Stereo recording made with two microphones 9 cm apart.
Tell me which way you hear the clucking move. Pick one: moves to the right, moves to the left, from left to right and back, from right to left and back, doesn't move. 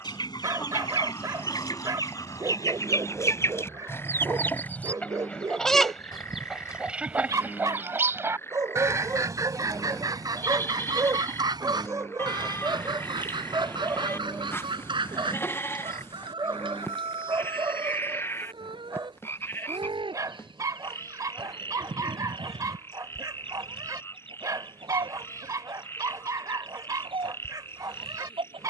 moves to the right.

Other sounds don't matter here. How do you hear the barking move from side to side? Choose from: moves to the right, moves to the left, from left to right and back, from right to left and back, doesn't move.
doesn't move.